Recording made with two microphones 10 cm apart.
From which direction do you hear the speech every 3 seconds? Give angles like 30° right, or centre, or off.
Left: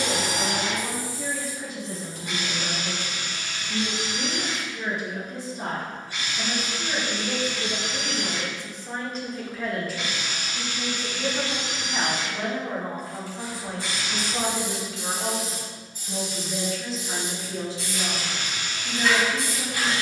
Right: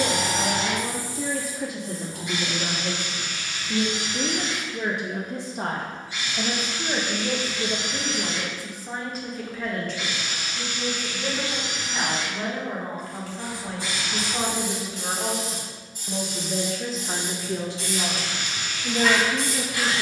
80° right, 80° right, 30° right, 10° left, 10° left, 40° right, 70° right.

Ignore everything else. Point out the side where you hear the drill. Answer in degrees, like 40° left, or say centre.
60° left.